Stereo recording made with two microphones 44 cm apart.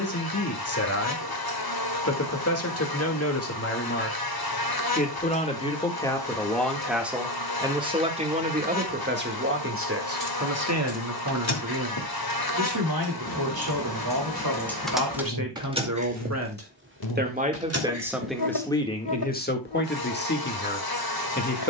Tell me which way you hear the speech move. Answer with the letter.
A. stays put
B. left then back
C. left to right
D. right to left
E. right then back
E.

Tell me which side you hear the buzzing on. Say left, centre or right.
left.